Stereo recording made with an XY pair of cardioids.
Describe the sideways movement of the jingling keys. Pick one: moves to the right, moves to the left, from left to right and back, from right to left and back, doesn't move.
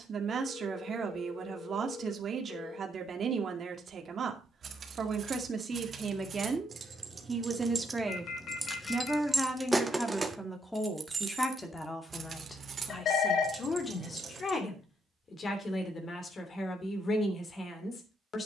from right to left and back.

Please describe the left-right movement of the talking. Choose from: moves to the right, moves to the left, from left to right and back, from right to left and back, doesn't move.
moves to the left.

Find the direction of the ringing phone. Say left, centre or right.
left.